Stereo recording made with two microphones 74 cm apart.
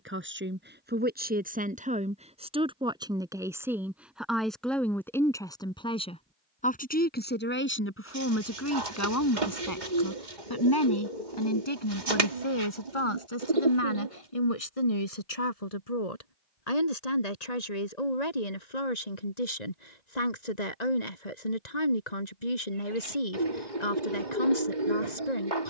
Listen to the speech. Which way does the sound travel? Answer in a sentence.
You can hear the speech travel towards the left.